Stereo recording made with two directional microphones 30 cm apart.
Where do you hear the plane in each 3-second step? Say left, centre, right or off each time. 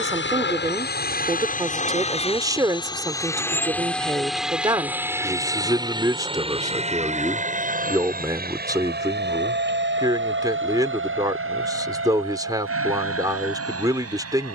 left, centre, right, right, right.